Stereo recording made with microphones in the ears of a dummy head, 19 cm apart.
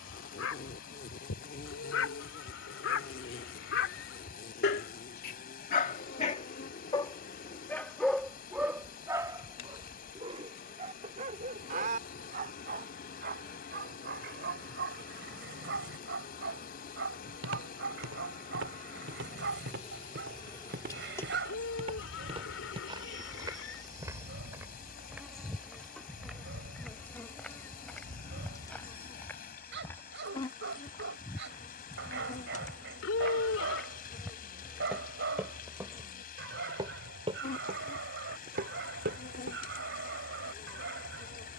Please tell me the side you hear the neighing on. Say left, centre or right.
left.